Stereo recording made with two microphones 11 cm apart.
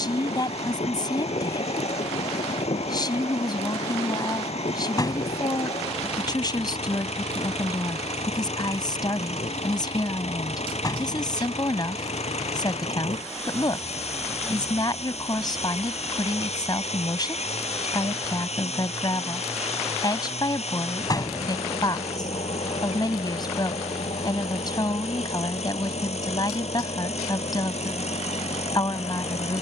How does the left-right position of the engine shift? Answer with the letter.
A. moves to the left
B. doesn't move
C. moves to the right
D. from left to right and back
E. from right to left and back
B.